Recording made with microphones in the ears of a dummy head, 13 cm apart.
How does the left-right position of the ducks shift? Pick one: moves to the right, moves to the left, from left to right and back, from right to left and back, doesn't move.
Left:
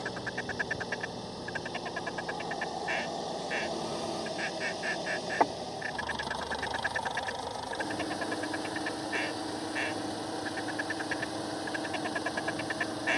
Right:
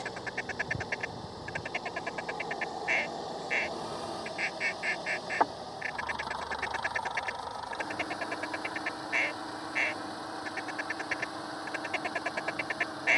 doesn't move.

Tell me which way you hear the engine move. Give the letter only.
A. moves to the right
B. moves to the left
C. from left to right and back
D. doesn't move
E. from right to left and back
D.